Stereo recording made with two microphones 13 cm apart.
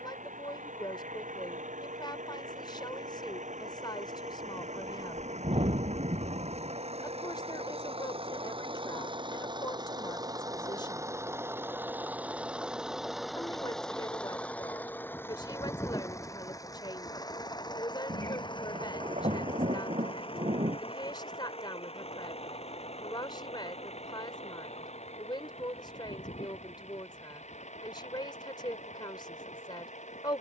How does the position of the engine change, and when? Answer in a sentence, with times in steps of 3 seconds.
In this clip you hear the engine on the right from 0 s, in the centre from 12 s and on the left from 15 s.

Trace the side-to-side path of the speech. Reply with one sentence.
In this clip you hear the speech stay in one place.